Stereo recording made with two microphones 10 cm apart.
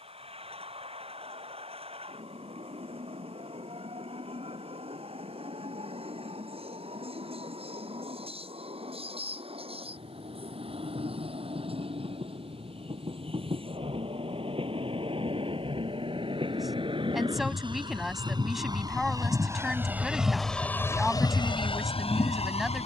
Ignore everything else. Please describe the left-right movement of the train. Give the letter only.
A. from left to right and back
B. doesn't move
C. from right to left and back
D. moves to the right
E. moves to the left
E.